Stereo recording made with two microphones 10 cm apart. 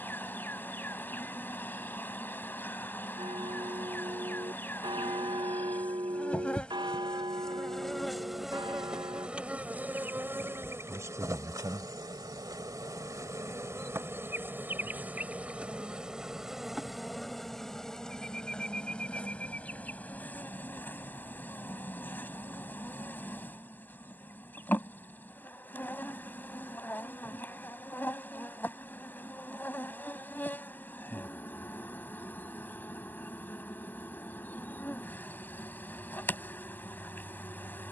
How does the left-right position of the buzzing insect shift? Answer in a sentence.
You can hear the buzzing insect go right and come back.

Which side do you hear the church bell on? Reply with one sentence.
You can hear the church bell on the right.